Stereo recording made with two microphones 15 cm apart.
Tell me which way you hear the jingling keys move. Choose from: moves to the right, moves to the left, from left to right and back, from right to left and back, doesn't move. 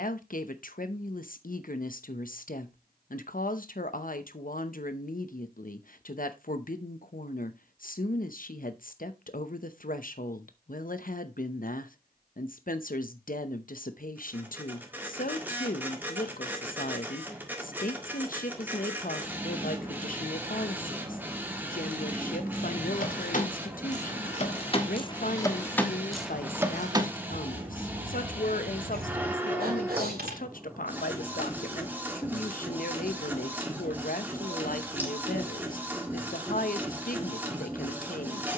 moves to the right.